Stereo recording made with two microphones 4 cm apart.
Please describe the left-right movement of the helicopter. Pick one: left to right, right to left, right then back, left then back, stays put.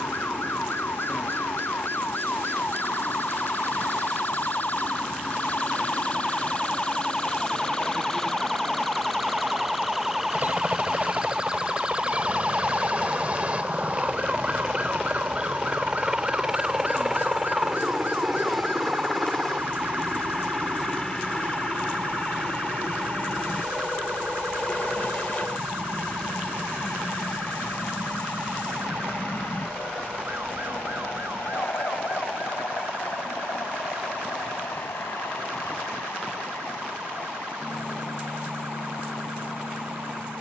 right to left.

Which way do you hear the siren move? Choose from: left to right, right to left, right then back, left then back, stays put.
left to right.